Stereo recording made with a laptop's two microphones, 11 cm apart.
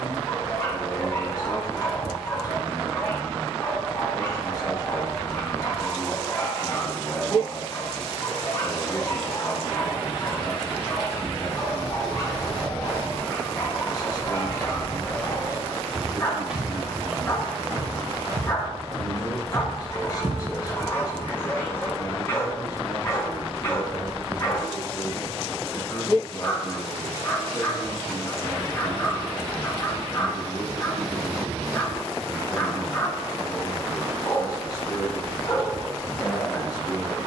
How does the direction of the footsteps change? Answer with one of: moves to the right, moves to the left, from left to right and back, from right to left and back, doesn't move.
from right to left and back.